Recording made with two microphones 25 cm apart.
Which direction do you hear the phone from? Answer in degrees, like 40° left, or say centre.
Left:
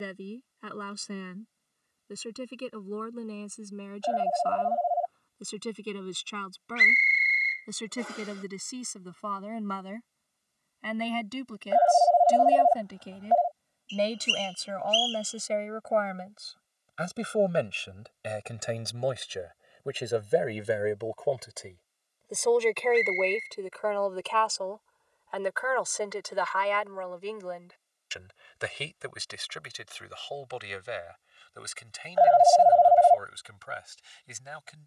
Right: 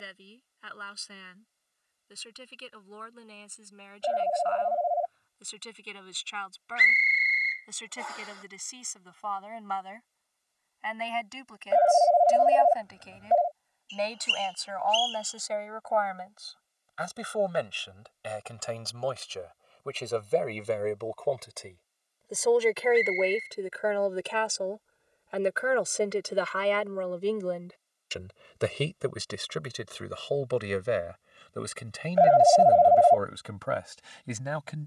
30° right.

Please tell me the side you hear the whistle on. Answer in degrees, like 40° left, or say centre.
30° left.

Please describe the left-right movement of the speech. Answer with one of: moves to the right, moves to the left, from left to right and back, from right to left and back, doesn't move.
moves to the right.